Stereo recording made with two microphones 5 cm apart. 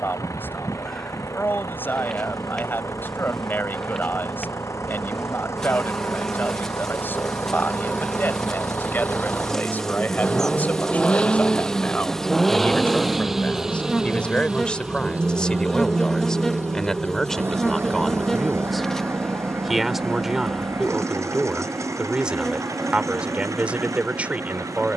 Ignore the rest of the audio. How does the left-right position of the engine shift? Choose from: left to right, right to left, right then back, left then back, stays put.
left to right.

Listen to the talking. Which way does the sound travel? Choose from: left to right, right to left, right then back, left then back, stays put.
left to right.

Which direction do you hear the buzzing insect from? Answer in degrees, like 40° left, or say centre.
10° left.